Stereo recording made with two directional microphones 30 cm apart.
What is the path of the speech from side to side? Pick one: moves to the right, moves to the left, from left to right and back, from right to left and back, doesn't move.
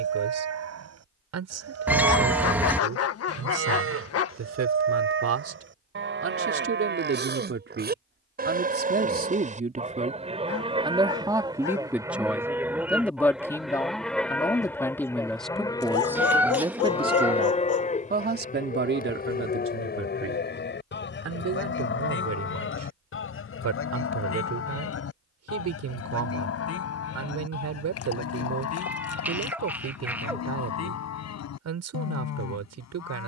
from right to left and back.